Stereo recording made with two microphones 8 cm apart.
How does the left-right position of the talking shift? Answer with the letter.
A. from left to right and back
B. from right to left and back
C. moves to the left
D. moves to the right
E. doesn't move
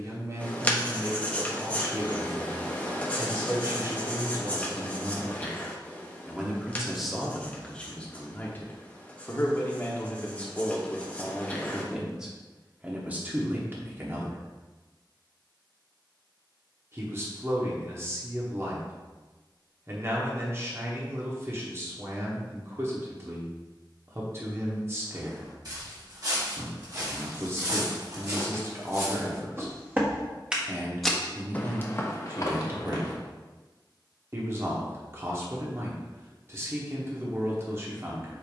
B.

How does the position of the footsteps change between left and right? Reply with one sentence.
You can hear the footsteps move from right to left.